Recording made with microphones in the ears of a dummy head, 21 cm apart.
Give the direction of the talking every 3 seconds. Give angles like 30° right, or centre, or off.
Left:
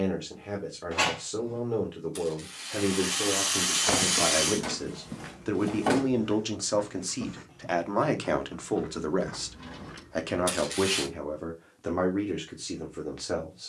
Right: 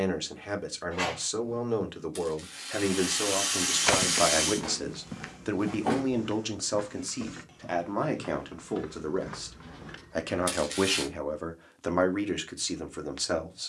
60° right, 40° right, centre, 20° right, 60° right.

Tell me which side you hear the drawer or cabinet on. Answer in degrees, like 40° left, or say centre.
20° left.